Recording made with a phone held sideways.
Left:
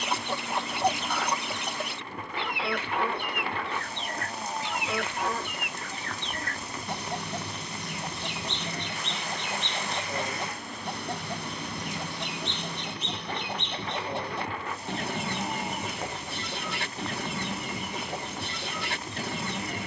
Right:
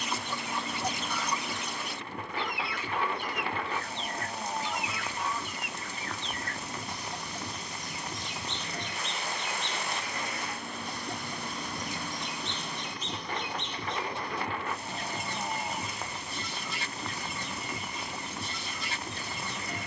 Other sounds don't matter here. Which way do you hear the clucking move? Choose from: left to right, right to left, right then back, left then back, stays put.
stays put.